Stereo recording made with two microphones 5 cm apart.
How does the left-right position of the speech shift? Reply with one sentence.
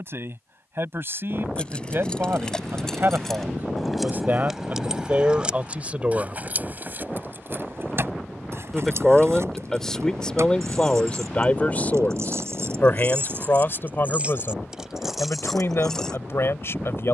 In this clip you hear the speech move to the left.